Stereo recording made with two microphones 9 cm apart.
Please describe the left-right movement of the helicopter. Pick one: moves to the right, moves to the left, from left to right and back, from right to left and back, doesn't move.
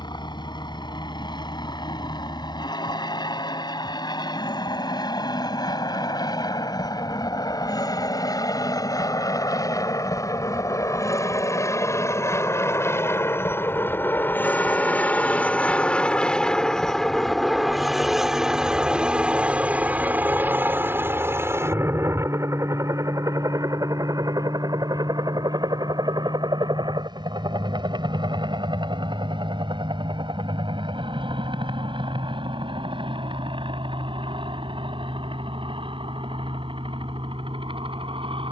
moves to the right.